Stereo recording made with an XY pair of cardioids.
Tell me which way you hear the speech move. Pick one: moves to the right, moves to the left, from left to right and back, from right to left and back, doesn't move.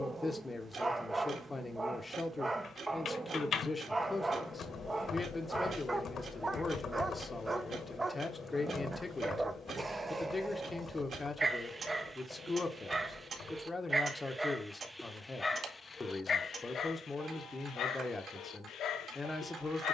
doesn't move.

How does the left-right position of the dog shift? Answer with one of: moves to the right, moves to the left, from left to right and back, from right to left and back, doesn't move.
moves to the left.